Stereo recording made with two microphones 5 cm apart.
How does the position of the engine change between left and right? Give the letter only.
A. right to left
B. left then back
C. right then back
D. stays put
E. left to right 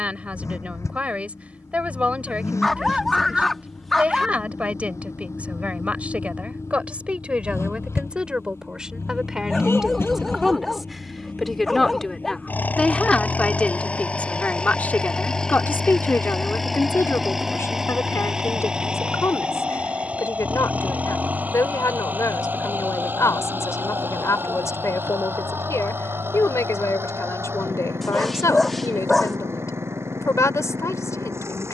E.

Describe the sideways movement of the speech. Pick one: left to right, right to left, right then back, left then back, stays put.
right to left.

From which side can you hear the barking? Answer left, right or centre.
centre.